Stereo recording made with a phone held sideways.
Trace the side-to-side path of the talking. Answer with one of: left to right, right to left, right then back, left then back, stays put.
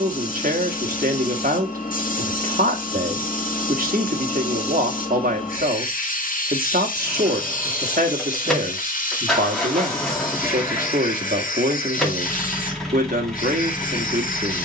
stays put.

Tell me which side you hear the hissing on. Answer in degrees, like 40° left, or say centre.
60° left.